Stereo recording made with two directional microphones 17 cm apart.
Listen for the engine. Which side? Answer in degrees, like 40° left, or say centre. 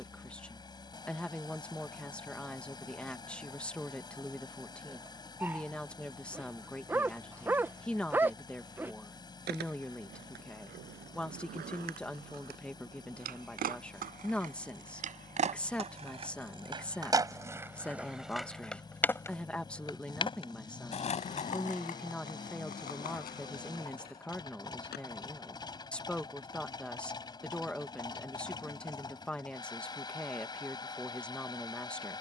20° left.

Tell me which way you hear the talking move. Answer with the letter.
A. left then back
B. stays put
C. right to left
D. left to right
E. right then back
B.